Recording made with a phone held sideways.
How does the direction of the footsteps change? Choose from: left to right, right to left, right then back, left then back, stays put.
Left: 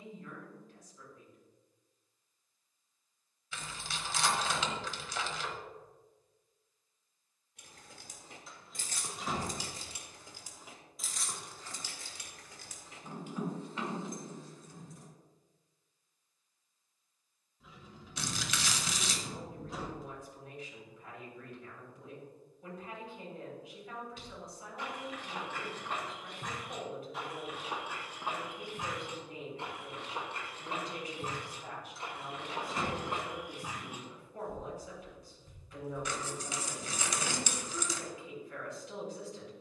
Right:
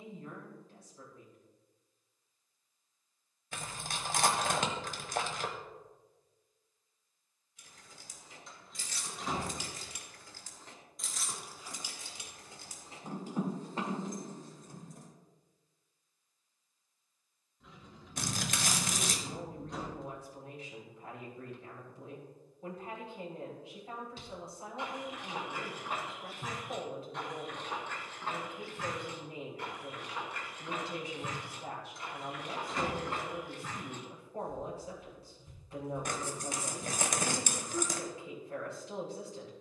left then back.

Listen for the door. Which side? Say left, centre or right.
centre.